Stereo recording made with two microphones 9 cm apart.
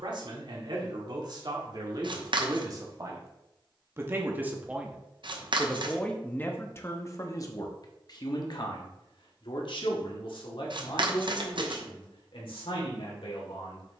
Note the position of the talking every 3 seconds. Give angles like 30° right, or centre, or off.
50° right, 20° right, 40° left, 70° left, 80° left.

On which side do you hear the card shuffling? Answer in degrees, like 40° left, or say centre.
60° right.